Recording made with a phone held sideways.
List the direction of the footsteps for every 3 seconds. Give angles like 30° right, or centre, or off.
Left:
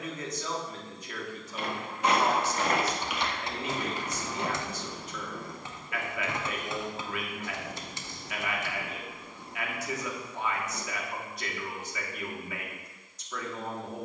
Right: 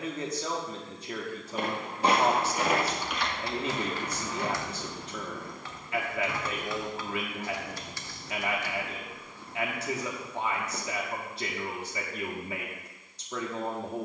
30° right, 30° left, 40° left, centre, off.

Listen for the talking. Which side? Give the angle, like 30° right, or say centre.
30° right.